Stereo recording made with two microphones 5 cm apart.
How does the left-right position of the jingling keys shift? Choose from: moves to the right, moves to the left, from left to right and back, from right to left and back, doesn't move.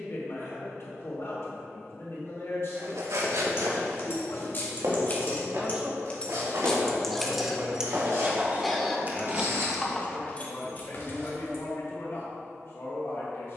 from left to right and back.